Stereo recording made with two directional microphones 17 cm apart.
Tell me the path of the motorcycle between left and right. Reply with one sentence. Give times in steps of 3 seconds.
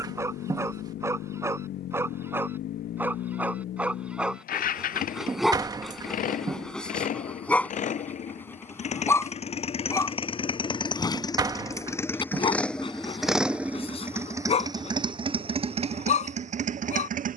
You can hear the motorcycle on the left from 0 s, in the centre from 12 s and on the right from 15 s.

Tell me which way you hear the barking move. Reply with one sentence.
You can hear the barking move from right to left.